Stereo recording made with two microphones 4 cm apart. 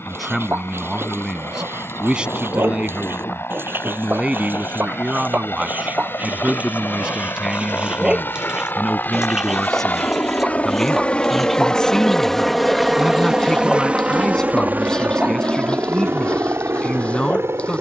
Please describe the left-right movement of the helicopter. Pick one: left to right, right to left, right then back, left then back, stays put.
left to right.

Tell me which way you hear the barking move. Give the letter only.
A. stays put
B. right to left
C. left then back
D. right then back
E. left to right
B.